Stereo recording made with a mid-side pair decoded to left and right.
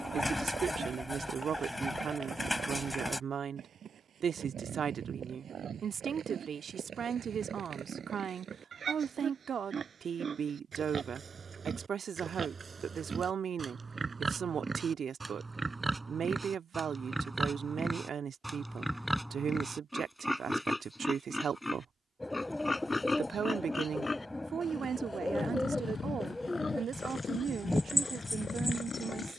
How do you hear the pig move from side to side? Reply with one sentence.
You can hear the pig travel towards the left.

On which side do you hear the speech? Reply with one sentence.
In this clip you hear the speech on the right.